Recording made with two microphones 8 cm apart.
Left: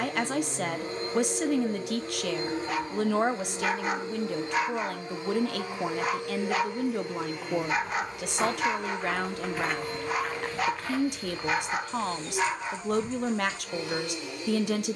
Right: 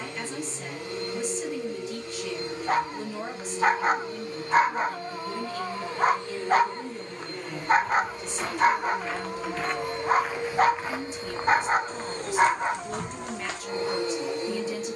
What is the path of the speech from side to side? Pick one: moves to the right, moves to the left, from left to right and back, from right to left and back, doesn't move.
doesn't move.